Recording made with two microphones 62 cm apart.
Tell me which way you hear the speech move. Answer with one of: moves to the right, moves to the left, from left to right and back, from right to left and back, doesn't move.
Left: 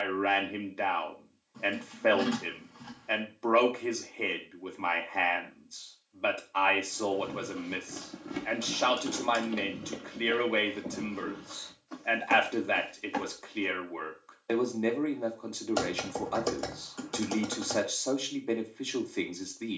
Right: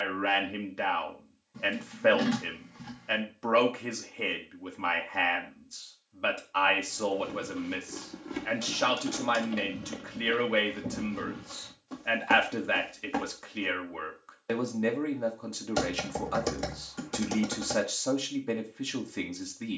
doesn't move.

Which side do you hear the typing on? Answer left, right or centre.
right.